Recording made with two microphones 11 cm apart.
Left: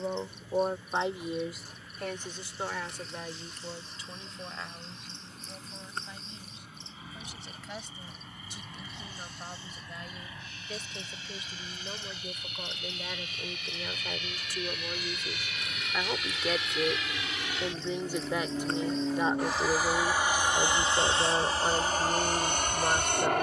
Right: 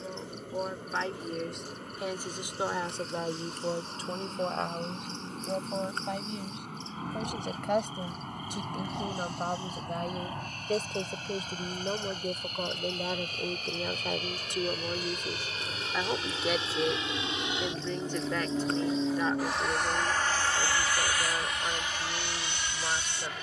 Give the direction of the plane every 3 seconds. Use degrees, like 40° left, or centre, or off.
60° right, 60° right, 50° right, 50° right, 40° right, 30° right, centre, 40° left.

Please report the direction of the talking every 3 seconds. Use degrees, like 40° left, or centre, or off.
centre, 50° right, 60° right, 50° right, 30° right, 10° right, 20° left, 30° left.